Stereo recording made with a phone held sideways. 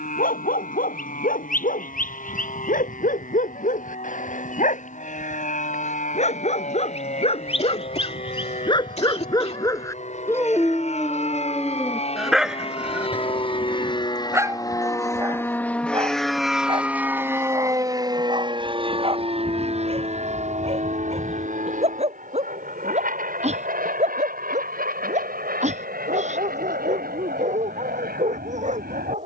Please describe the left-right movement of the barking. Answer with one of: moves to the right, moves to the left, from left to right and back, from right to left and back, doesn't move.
moves to the right.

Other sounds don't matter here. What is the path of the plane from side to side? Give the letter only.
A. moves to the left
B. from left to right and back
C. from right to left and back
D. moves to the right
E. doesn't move
D.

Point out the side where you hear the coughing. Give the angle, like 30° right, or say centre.
50° left.